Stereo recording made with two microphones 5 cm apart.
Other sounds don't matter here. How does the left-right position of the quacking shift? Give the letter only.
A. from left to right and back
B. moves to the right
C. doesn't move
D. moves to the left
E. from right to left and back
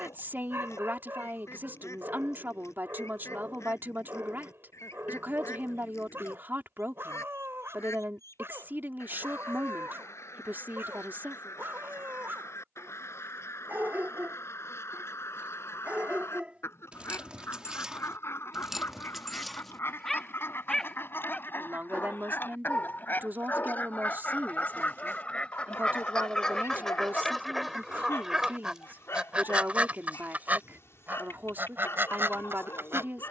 B.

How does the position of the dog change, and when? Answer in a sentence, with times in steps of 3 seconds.
You can hear the dog on the right from 0 s, in the centre from 18 s and on the left from 21 s.